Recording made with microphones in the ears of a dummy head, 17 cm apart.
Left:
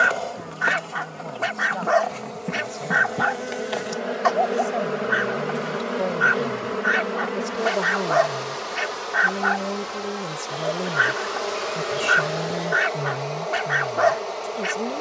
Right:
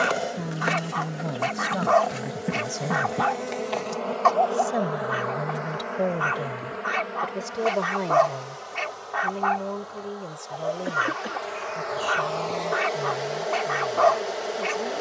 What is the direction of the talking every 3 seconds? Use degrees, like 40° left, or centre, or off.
40° right, 20° right, centre, 20° left, 30° left.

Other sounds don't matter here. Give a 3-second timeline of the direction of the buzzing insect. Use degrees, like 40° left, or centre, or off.
10° right, 20° left, 60° left, 70° left, centre.